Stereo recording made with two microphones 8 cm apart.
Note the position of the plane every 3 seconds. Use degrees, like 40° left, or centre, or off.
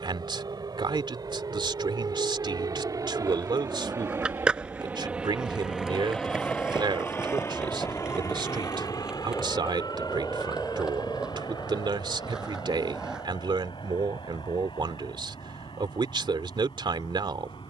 70° right, 30° right, 30° left, 60° left, 60° left, 70° left.